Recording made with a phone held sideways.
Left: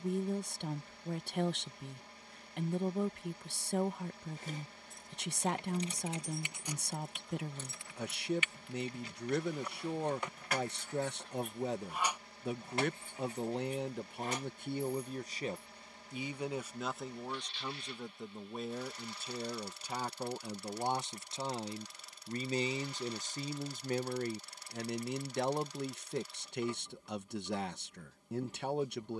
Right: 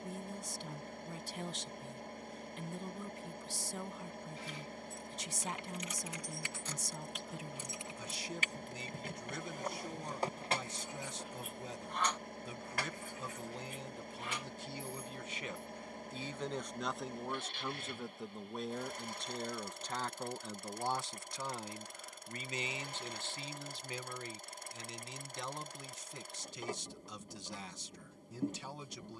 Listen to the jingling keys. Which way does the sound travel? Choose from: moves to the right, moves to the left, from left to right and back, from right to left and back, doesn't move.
from left to right and back.